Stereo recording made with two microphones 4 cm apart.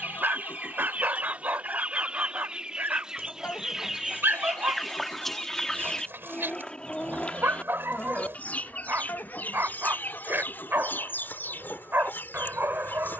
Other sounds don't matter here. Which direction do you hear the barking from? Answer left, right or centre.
right.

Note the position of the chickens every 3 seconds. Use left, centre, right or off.
right, centre, left, left, left.